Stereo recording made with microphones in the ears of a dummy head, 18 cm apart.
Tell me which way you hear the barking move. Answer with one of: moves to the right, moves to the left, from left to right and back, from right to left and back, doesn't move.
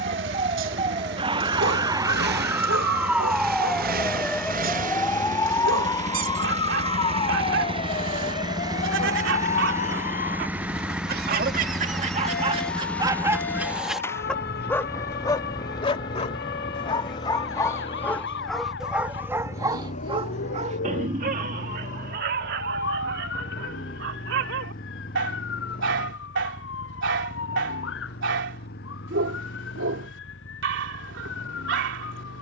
from right to left and back.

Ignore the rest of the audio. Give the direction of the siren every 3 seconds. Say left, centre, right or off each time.
right, centre, left, left, left, left, left, left, left, left, left.